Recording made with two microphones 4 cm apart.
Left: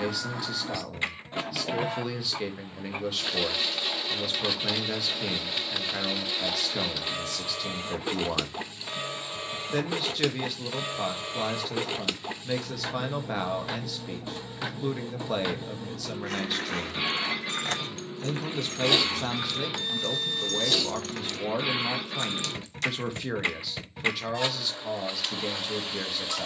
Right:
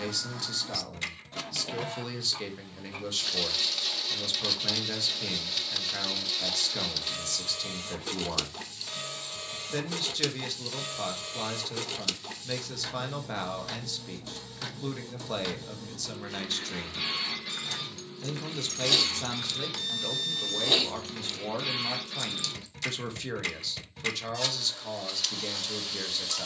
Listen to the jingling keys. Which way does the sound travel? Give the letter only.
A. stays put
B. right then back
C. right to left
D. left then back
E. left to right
B.